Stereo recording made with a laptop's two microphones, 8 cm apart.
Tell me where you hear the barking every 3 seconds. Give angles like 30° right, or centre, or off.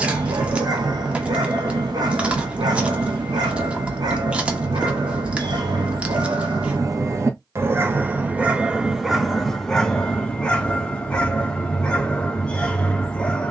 60° right, 60° right, 30° right, 10° left, 10° left.